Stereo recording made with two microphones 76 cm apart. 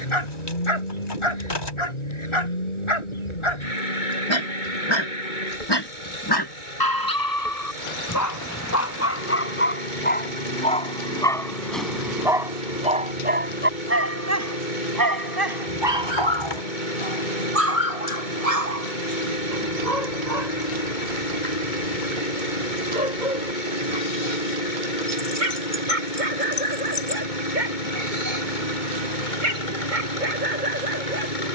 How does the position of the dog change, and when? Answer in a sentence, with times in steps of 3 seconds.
In this clip you hear the dog on the left from 0 s, in the centre from 9 s and on the right from 15 s.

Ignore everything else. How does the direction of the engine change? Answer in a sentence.
You can hear the engine stay in one place.